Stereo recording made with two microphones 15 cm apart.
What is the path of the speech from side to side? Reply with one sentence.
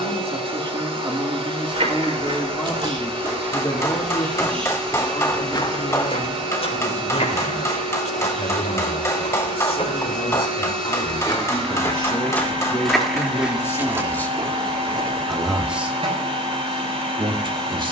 In this clip you hear the speech move from right to left and back again.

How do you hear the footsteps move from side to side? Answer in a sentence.
In this clip you hear the footsteps go left and come back.